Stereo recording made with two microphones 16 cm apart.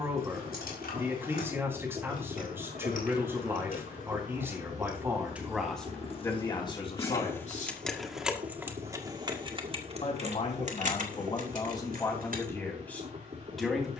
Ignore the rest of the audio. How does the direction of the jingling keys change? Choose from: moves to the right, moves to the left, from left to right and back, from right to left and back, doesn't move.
moves to the right.